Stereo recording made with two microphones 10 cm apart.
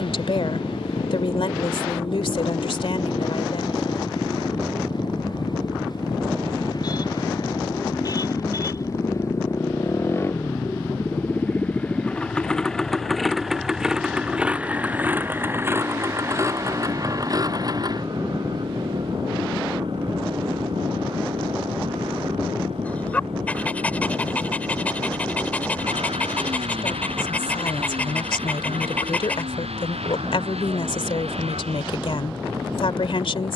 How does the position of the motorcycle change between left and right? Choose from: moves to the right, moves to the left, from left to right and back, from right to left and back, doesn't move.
moves to the right.